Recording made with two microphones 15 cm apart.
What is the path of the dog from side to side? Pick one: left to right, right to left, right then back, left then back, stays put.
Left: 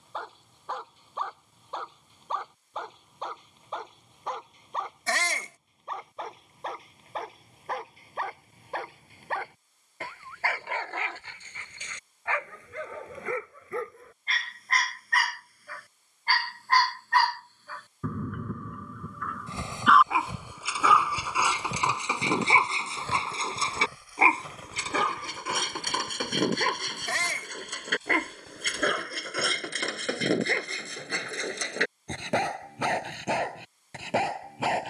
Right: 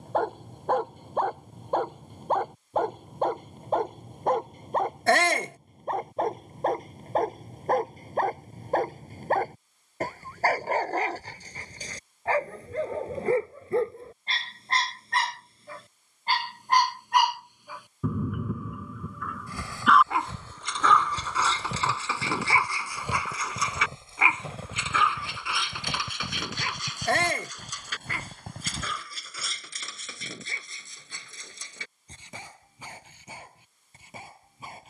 right to left.